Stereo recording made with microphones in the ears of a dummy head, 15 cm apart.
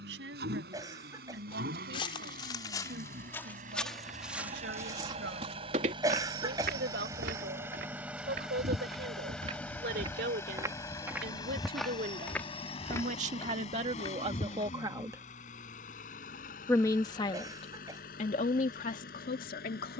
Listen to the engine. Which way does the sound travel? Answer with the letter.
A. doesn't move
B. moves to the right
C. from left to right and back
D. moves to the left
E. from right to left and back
D.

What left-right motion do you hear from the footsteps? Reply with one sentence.
You can hear the footsteps go right and come back.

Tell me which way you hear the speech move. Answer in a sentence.
In this clip you hear the speech travel towards the left.